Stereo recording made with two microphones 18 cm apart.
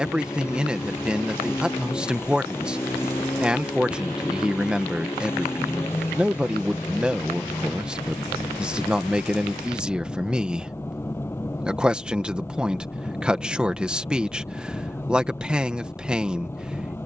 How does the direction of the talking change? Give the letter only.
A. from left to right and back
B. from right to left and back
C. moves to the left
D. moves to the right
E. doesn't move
E.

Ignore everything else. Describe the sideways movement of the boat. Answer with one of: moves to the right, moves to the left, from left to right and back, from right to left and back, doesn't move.
doesn't move.